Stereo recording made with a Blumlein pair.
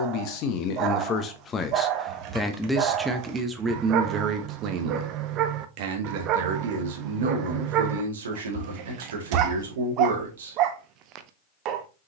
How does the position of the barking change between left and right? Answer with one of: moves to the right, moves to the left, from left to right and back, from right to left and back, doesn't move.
doesn't move.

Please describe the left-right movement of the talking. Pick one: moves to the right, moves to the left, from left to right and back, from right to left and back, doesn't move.
moves to the right.